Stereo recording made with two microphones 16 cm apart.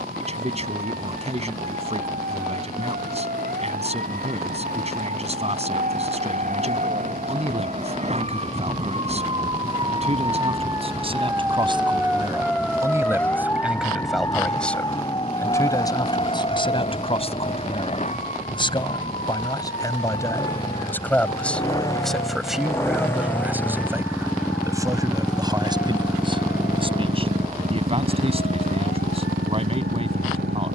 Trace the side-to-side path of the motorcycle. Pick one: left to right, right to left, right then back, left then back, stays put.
left to right.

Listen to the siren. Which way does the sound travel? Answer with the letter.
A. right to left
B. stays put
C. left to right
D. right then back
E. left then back
A.